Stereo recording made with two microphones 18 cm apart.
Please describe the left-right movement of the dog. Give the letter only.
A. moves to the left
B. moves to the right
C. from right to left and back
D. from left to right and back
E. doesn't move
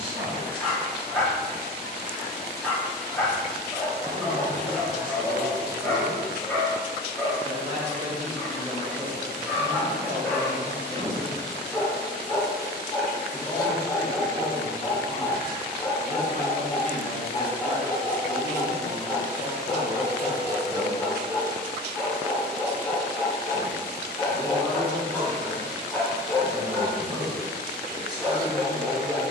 E.